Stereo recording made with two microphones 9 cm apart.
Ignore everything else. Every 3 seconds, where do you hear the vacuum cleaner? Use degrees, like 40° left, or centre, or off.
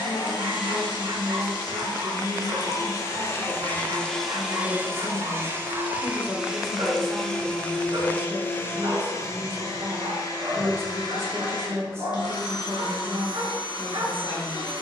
50° left, centre, 10° left, 40° left, 50° left.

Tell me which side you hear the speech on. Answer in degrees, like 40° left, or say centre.
30° right.